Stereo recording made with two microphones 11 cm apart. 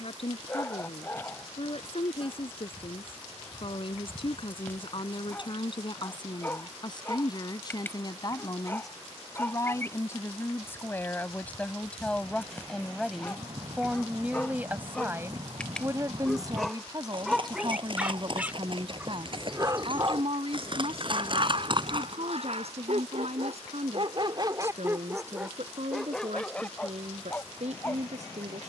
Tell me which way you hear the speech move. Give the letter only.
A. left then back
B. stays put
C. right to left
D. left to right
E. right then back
D.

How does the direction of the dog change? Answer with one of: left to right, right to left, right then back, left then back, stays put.
right then back.